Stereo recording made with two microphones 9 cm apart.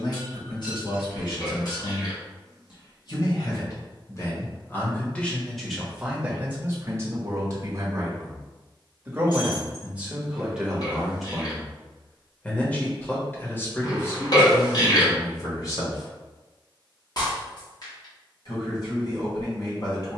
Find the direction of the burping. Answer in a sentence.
In this clip you hear the burping on the left.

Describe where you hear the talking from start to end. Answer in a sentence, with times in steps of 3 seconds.
You can hear the talking on the left from 0 s, on the right from 6 s, in the centre from 9 s and on the left from 12 s.